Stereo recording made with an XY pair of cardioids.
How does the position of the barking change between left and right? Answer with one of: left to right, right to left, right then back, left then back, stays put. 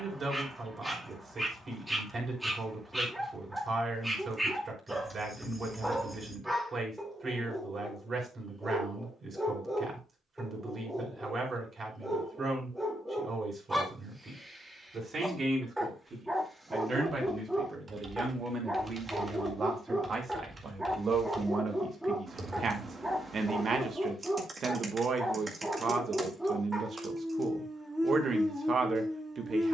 stays put.